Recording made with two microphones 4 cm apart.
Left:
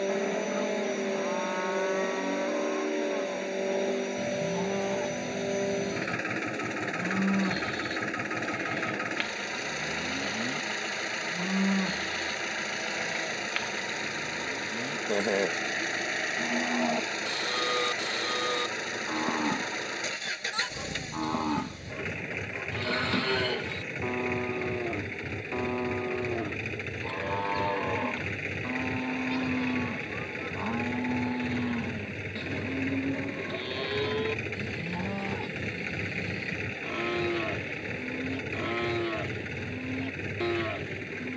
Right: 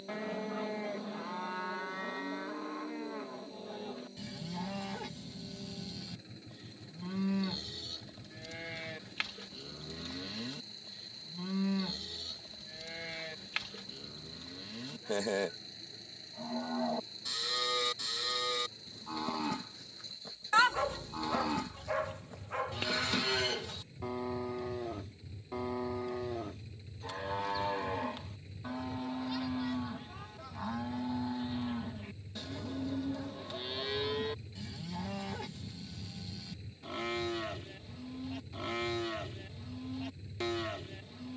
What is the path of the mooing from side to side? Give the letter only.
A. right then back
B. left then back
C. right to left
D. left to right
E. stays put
E.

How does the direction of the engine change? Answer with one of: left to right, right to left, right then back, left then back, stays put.
stays put.